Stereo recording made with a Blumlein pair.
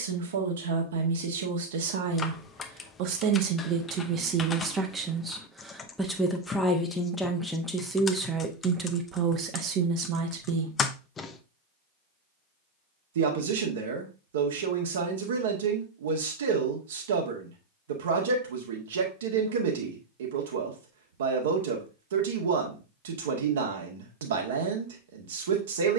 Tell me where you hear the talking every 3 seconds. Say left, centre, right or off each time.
right, right, centre, right, right, right, right, right, right.